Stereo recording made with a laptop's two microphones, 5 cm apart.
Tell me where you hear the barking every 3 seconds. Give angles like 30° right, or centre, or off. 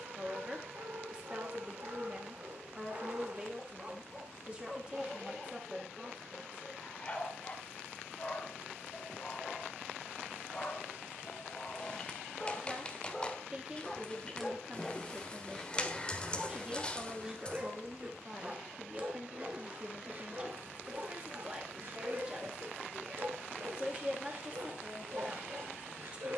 60° right, 10° right, 30° left, 20° left, 10° left, 10° right, 30° right, 50° right, 60° right.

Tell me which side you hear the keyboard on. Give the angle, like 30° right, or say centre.
20° left.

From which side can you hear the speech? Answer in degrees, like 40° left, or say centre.
20° right.